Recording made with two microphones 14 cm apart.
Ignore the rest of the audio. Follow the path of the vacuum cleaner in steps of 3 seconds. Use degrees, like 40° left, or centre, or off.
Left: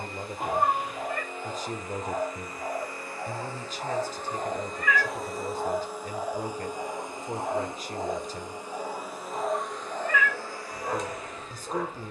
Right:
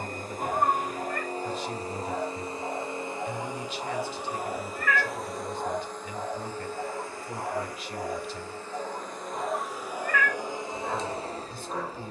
40° right, 10° right, 20° left, 20° right.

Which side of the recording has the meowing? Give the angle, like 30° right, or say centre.
centre.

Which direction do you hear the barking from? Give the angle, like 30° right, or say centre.
40° left.